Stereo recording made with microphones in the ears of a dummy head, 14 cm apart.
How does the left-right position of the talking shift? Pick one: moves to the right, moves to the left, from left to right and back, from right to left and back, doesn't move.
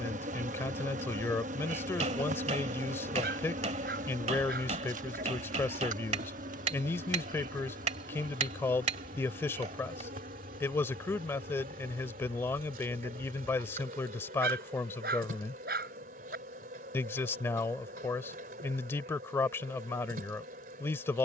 doesn't move.